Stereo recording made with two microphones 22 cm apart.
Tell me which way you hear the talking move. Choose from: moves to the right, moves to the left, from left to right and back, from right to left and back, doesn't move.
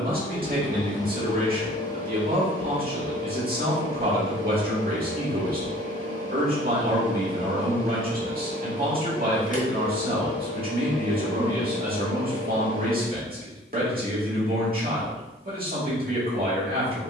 doesn't move.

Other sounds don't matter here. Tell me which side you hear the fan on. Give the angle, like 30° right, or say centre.
40° left.